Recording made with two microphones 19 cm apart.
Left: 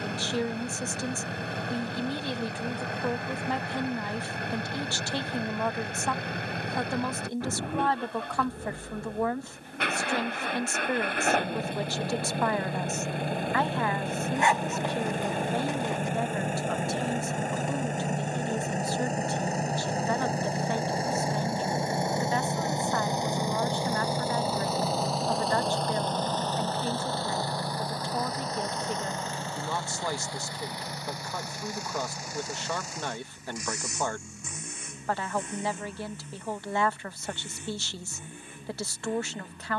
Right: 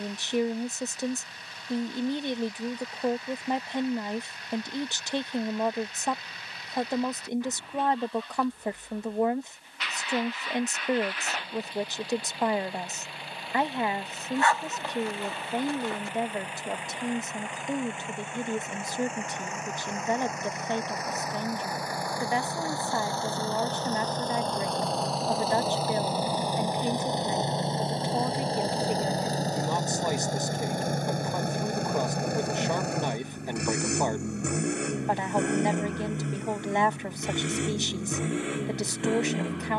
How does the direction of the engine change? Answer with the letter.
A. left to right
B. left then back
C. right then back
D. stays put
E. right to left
A.